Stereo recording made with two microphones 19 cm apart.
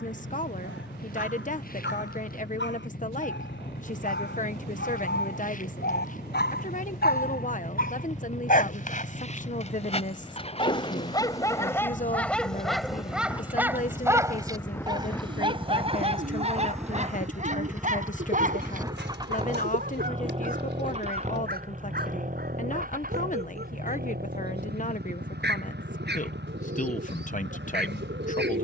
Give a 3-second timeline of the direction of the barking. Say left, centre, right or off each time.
left, left, left, left, centre, right, right, right, right, right.